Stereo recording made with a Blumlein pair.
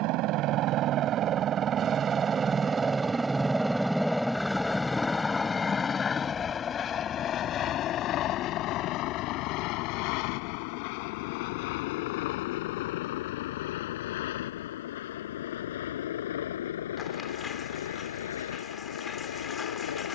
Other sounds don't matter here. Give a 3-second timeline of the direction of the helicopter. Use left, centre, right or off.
right, centre, left, left, left, left, left.